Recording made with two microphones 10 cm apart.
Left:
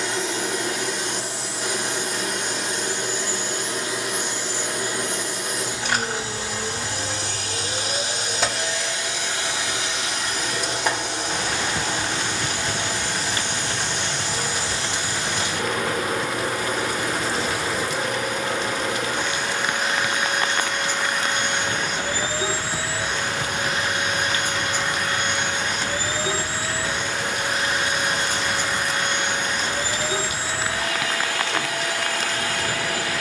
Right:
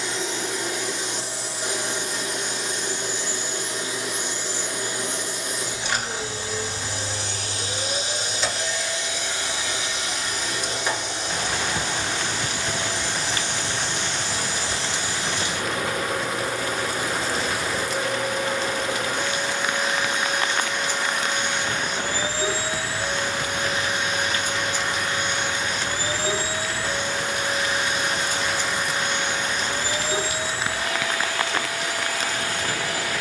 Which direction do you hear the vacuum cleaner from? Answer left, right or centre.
left.